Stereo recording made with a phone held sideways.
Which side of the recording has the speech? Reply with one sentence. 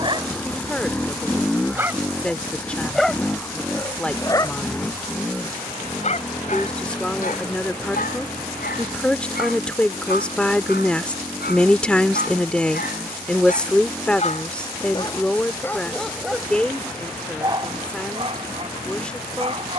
In this clip you hear the speech in the centre.